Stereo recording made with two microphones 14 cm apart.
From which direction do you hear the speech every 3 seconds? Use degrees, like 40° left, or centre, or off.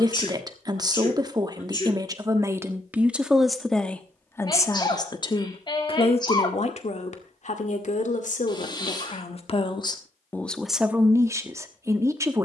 30° right, 20° left, 50° left, 10° left.